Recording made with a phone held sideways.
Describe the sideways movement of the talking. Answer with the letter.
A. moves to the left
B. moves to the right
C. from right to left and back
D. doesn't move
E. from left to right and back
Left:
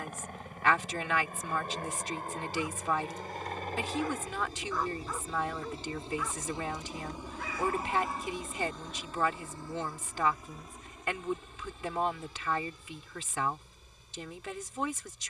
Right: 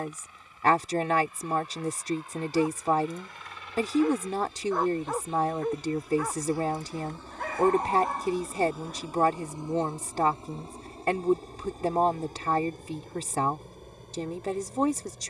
D.